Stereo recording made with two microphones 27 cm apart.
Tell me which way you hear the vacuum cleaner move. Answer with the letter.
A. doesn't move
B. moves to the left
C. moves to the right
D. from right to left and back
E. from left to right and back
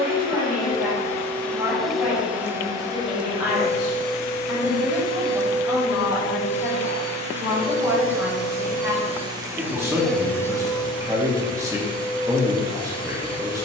E.